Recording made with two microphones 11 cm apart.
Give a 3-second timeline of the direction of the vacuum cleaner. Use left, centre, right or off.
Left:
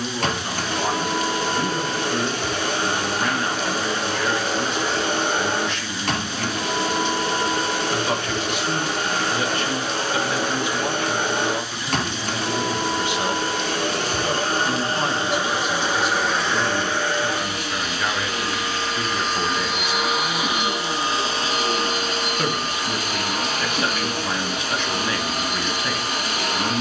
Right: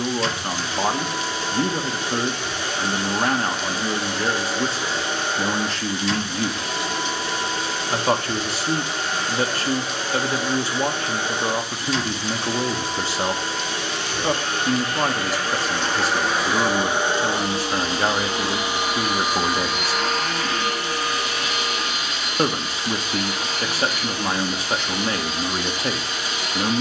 left, left, left, left, left, centre, centre, left, left.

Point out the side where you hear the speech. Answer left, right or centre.
right.